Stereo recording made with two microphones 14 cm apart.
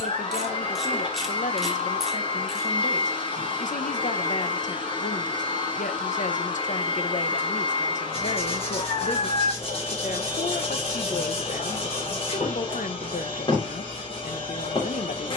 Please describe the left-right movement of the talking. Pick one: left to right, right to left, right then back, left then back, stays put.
stays put.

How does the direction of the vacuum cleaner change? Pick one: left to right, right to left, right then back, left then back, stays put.
stays put.